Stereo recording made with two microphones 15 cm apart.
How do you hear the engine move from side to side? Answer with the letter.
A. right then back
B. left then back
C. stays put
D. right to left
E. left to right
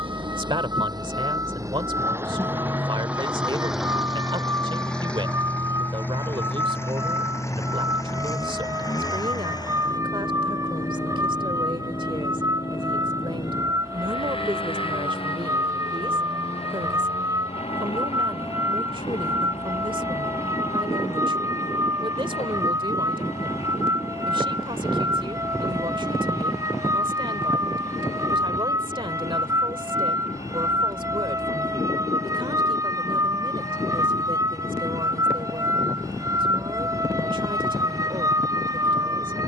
D.